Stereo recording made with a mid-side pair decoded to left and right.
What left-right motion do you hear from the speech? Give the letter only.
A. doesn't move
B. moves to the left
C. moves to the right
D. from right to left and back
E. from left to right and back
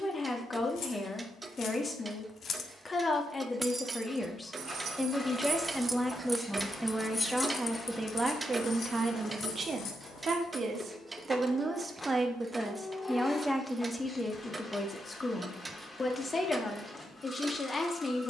E.